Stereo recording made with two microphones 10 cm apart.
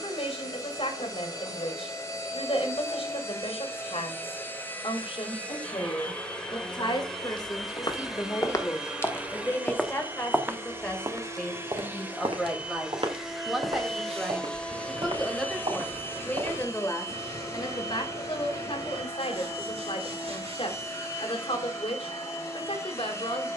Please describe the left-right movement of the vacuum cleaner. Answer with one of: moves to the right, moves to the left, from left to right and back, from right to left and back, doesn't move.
from left to right and back.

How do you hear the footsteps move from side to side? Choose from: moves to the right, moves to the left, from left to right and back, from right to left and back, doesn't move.
moves to the right.